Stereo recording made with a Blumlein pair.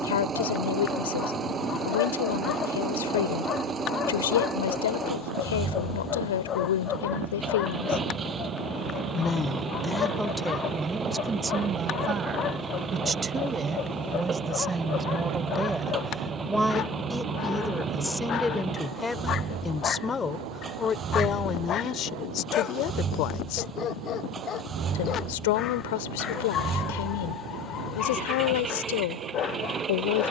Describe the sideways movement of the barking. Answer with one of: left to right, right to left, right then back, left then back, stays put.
stays put.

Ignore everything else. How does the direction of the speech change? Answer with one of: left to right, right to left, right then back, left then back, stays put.
right then back.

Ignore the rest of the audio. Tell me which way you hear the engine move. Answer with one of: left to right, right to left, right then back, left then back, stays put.
stays put.